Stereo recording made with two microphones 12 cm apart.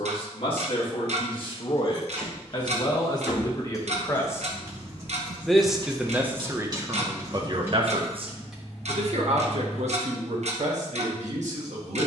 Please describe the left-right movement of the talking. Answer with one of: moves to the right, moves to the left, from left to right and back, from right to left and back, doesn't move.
moves to the right.